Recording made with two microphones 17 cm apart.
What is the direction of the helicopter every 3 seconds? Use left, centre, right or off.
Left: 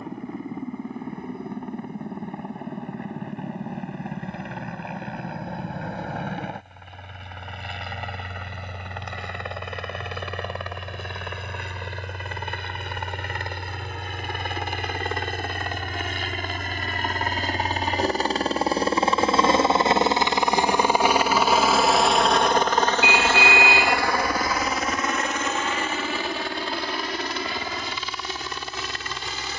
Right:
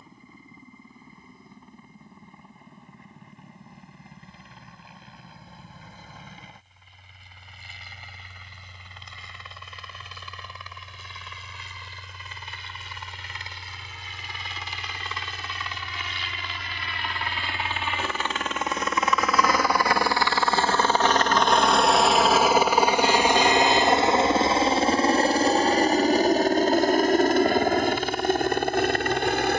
left, left, left, left, left, left, left, centre, right, right.